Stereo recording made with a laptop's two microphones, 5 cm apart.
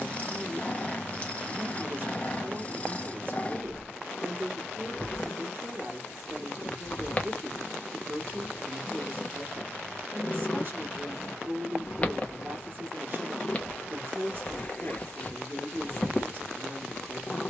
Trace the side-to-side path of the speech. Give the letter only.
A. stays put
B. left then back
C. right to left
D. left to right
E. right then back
A.